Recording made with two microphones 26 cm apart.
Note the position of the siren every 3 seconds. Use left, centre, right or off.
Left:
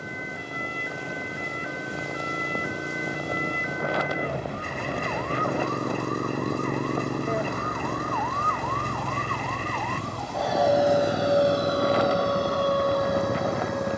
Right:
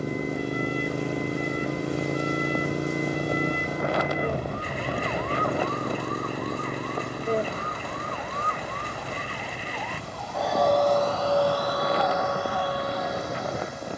right, right, right, centre, left.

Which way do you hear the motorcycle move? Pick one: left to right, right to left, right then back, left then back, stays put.
right to left.